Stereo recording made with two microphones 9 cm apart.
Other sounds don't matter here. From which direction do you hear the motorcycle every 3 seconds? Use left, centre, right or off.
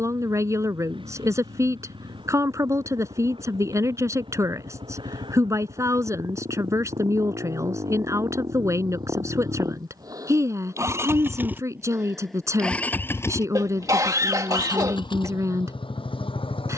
right, right, right, right, left, left.